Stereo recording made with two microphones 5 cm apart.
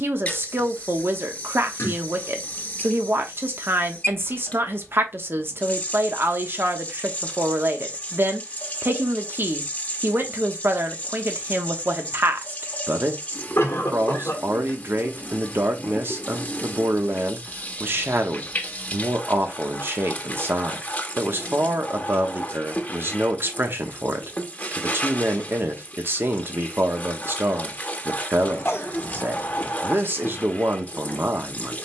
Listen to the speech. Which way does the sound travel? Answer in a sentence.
You can hear the speech stay put.